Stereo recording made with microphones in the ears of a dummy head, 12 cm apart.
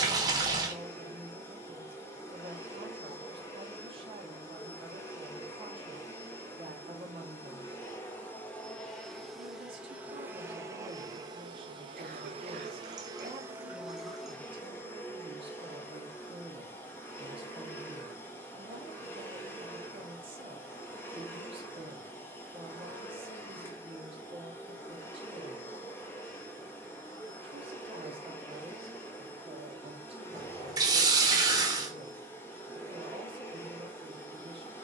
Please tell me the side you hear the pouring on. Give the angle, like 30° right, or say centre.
30° right.